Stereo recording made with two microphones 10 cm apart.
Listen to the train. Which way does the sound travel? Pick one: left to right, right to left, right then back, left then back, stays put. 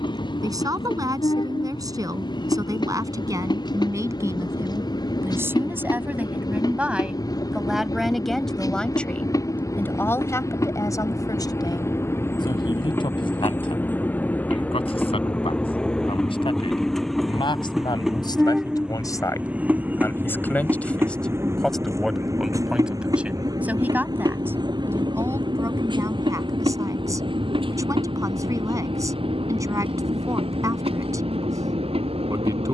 left to right.